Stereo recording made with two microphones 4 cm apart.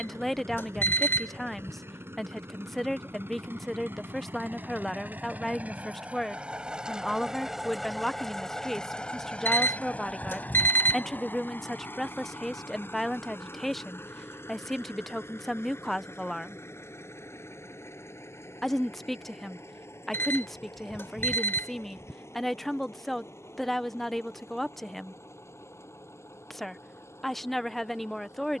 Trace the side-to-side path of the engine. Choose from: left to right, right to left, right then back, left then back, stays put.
right to left.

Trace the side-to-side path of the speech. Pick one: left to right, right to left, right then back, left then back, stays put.
stays put.